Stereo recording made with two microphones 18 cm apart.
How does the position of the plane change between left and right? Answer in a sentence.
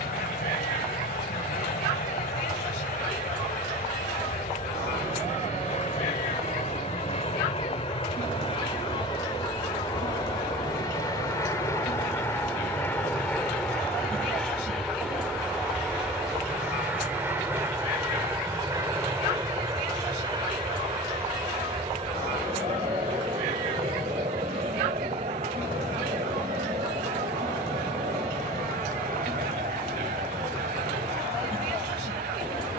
In this clip you hear the plane go from the left side to the right.